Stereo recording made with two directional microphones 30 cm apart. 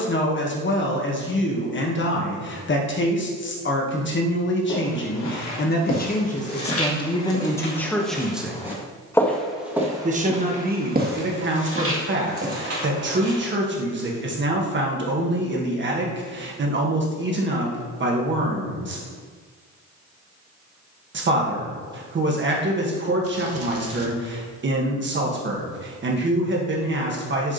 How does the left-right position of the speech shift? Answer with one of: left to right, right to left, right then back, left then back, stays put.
left to right.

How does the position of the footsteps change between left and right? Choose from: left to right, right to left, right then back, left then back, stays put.
left to right.